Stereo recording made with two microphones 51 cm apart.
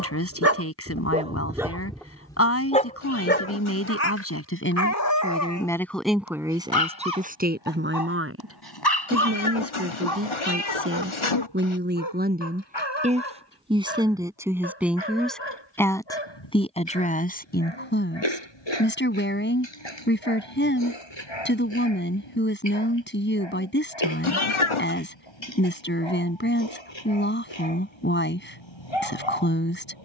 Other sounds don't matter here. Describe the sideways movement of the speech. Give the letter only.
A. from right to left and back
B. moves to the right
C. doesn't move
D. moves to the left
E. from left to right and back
E.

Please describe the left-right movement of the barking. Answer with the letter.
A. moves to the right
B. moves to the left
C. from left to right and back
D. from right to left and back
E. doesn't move
B.